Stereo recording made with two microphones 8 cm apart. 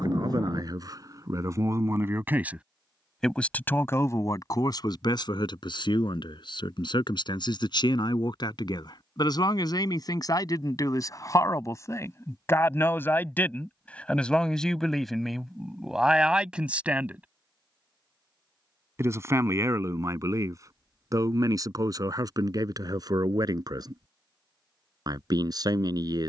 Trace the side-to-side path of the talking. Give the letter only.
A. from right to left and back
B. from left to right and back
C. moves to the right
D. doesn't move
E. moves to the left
A.